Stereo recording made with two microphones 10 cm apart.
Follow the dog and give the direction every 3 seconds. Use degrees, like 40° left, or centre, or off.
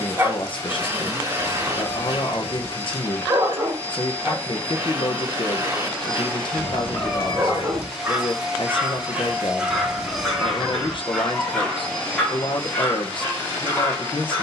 30° right, 30° right, 20° right, centre, 20° left.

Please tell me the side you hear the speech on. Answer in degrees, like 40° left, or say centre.
60° left.